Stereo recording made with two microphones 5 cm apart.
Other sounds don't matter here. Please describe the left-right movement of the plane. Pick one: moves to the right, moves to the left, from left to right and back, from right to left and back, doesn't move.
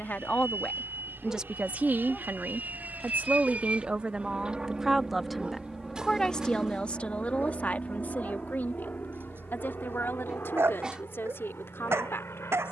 moves to the left.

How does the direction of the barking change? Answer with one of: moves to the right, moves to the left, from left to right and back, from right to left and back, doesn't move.
moves to the right.